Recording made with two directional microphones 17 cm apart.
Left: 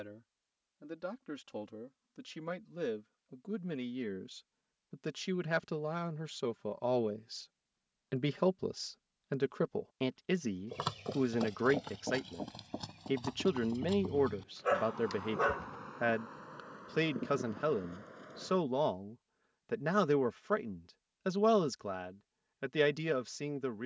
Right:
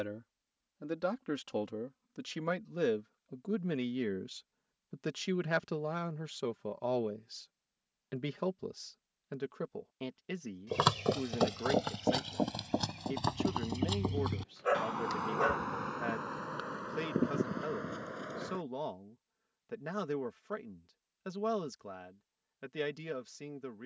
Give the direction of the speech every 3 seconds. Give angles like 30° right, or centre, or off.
40° right, 20° right, 10° left, 40° left, 40° left, 40° left, 40° left, 40° left.